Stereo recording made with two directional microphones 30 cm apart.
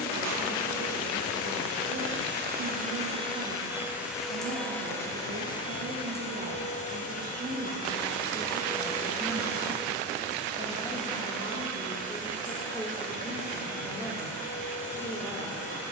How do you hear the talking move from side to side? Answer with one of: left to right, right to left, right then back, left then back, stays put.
right to left.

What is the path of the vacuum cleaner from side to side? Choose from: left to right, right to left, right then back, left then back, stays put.
right to left.